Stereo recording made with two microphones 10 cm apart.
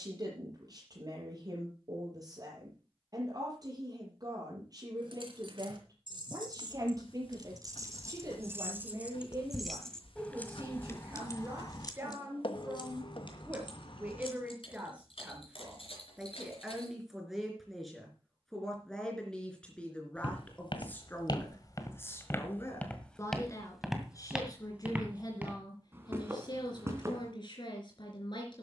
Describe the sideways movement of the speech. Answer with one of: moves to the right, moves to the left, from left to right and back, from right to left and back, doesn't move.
moves to the left.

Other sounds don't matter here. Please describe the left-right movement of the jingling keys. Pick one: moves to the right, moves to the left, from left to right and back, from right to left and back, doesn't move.
moves to the left.